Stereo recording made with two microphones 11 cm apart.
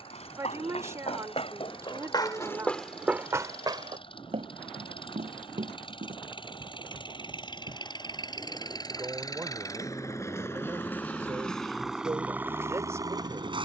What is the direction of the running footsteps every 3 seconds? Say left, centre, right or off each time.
left, right, right, off, off.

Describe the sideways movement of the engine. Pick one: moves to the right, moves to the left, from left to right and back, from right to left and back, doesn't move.
moves to the right.